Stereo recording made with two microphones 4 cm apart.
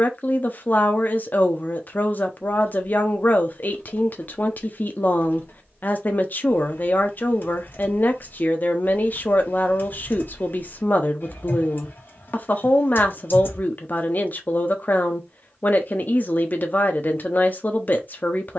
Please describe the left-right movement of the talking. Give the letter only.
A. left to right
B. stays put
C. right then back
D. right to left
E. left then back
B.